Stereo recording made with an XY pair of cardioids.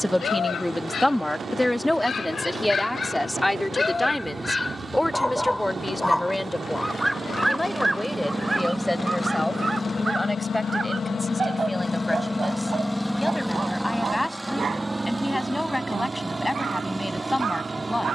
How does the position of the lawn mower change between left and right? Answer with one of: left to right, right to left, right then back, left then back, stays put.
left then back.